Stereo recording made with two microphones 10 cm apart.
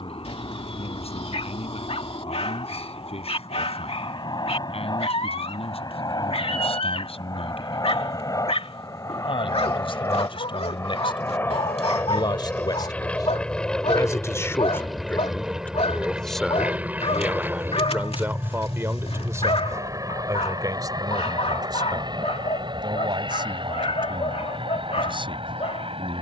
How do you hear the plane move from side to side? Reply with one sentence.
You can hear the plane travel towards the right.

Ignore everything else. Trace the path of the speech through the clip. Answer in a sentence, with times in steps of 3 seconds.
In this clip you hear the speech on the left from 0 s, in the centre from 15 s and on the right from 18 s.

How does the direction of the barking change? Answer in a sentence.
You can hear the barking stay put.